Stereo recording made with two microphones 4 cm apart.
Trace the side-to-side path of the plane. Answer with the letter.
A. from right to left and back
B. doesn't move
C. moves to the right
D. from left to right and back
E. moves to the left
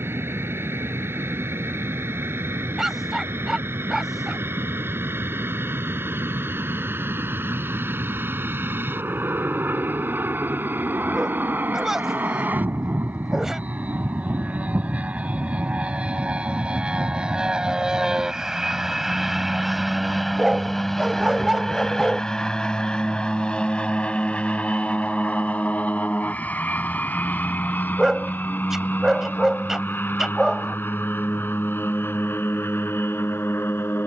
E.